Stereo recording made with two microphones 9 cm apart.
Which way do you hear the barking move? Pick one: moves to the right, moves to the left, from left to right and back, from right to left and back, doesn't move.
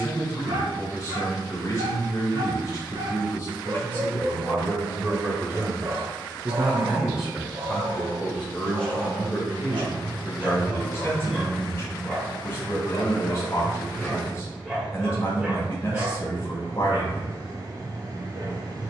from right to left and back.